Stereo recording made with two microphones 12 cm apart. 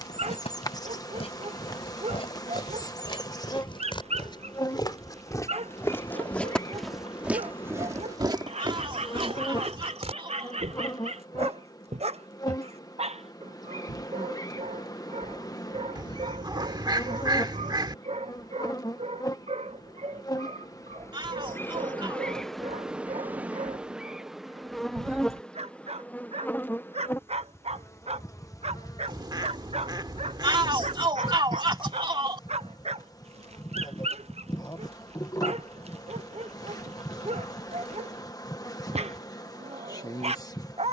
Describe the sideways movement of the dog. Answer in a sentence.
In this clip you hear the dog stay in one place.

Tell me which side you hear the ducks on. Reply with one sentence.
You can hear the ducks on the right.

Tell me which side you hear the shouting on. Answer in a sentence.
In this clip you hear the shouting on the right.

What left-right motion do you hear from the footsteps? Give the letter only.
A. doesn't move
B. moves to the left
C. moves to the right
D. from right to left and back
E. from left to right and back
C.